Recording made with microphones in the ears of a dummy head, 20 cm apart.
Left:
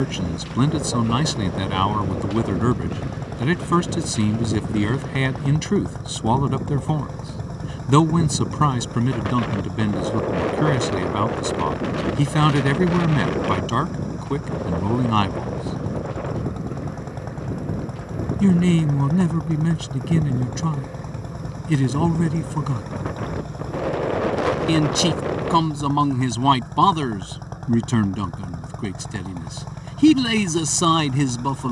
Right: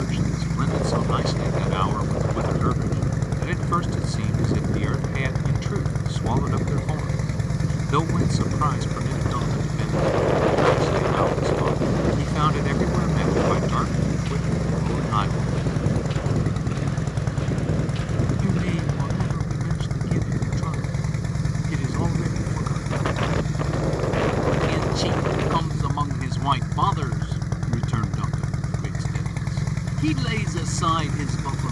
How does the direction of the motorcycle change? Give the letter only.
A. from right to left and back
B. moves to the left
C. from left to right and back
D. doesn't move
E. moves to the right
D.